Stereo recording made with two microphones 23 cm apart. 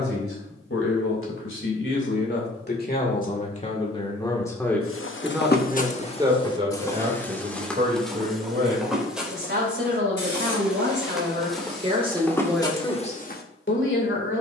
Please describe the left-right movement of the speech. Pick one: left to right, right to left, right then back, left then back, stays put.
right then back.